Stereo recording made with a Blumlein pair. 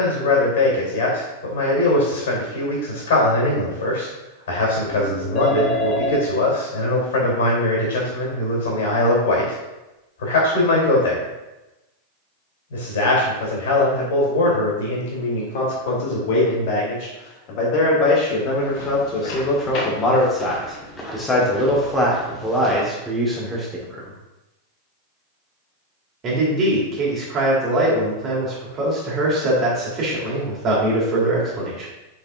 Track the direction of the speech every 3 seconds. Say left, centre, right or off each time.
left, left, left, left, left, left, left, centre, right, right, right.